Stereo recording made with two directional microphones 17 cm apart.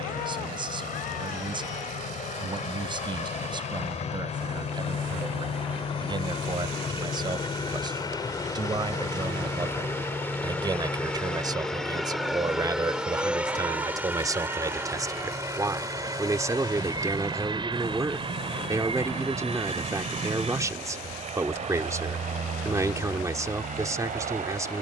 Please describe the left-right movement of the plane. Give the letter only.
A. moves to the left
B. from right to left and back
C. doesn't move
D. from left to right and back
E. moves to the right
E.